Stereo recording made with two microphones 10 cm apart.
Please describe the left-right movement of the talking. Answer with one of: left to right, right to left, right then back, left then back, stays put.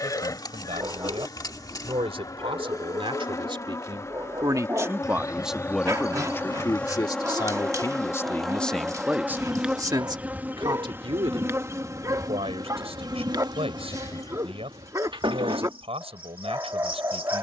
left then back.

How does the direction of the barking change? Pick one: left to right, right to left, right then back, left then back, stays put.
stays put.